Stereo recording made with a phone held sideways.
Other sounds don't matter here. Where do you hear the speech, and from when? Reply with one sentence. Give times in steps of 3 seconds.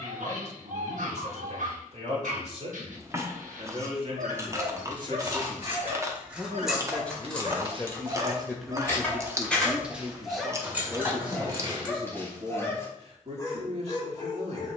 You can hear the speech on the right from 0 s, in the centre from 6 s and on the right from 9 s.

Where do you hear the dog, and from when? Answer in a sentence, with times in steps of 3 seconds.
You can hear the dog on the right from 0 s, in the centre from 9 s and on the left from 12 s.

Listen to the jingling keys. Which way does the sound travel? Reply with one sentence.
You can hear the jingling keys go left and come back.